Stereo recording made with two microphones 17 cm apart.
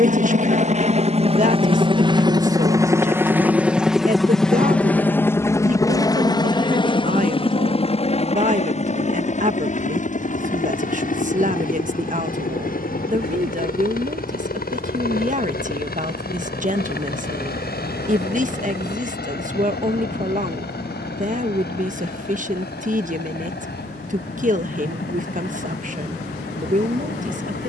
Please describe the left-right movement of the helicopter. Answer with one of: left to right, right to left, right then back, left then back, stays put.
right to left.